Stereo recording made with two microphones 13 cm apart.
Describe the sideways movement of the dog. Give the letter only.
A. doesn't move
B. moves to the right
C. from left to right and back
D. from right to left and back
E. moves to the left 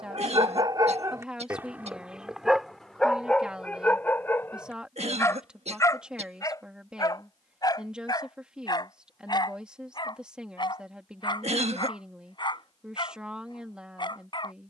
E.